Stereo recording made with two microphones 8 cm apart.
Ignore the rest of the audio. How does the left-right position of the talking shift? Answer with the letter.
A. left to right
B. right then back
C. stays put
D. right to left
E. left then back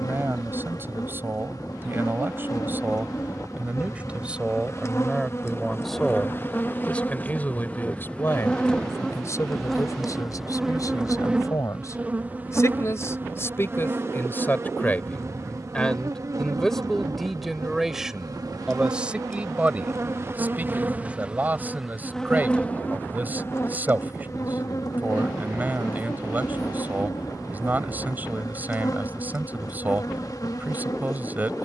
E.